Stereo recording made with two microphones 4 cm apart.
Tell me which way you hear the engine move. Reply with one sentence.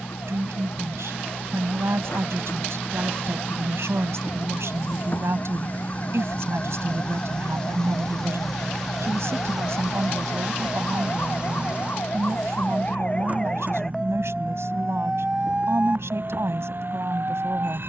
In this clip you hear the engine travel towards the right.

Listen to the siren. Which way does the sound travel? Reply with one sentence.
In this clip you hear the siren travel towards the right.